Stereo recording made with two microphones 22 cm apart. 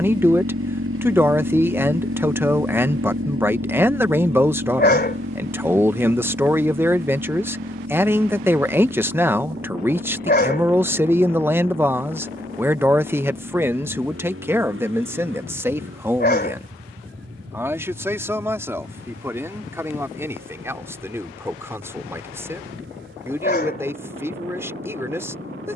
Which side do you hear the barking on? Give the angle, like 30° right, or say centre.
50° left.